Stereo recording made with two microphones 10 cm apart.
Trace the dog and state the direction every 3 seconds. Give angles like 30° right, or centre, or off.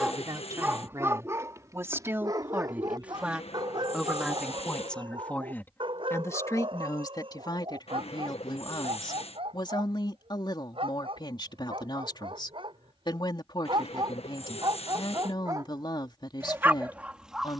30° right, 50° right, 60° right, 70° right, 50° right, 20° right.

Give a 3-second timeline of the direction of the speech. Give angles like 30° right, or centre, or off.
30° right, centre, 40° left, 50° left, 50° left, 50° left.